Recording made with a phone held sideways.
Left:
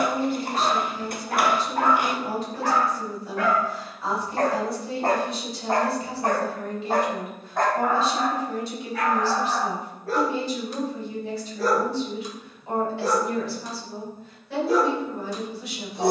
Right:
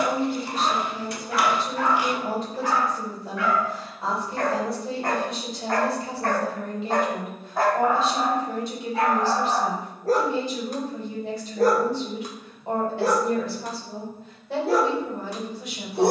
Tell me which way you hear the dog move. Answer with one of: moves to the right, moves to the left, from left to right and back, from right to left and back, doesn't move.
moves to the right.